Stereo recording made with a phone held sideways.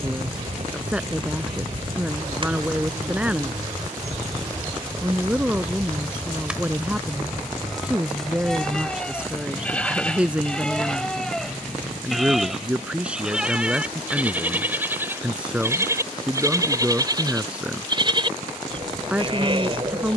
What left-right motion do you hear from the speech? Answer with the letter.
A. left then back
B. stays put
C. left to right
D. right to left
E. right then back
B.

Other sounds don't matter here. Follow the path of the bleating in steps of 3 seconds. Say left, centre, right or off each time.
right, right, centre, centre, centre, right, right.